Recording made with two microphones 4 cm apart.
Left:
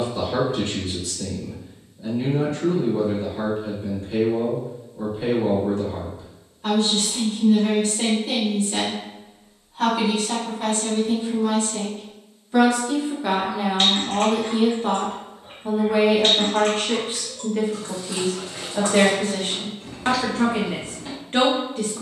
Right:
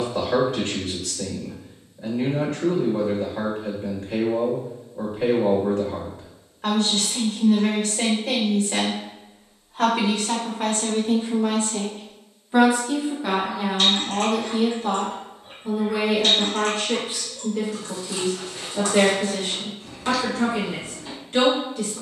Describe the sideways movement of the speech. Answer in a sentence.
You can hear the speech go from the right side to the left.